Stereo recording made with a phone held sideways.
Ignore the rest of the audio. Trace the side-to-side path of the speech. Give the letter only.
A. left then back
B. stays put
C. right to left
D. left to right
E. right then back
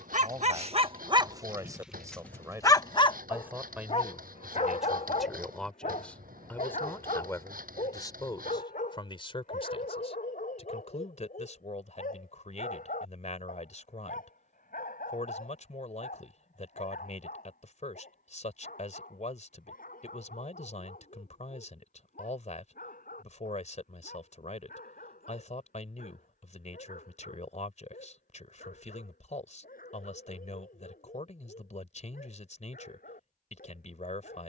C.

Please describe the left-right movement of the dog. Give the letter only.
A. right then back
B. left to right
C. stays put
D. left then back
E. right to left
E.